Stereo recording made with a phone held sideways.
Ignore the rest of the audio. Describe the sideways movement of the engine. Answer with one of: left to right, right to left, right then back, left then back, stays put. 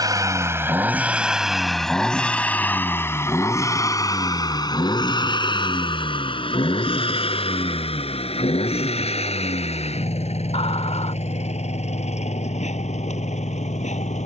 right to left.